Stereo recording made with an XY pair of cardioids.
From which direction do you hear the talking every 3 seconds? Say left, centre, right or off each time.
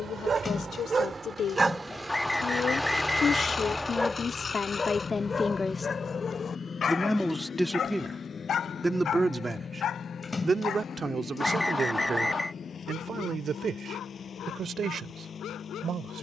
left, left, centre, right, right, right.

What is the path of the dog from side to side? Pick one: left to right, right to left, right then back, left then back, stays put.
right to left.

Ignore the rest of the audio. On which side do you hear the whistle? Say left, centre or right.
centre.